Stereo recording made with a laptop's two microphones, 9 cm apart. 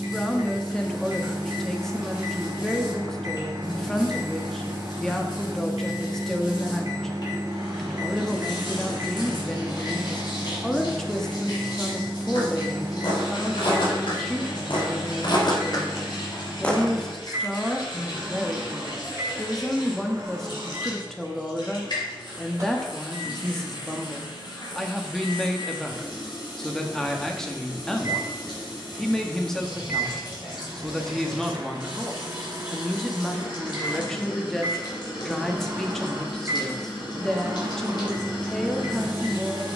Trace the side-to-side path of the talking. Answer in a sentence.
You can hear the talking stay in one place.